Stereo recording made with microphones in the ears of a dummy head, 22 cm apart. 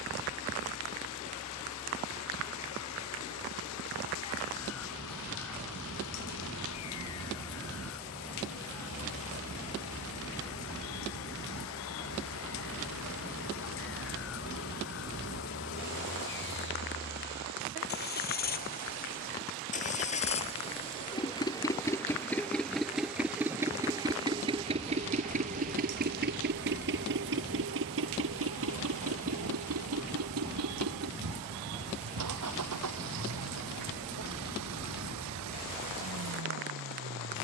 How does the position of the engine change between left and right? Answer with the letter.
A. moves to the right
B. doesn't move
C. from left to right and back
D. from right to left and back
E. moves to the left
A.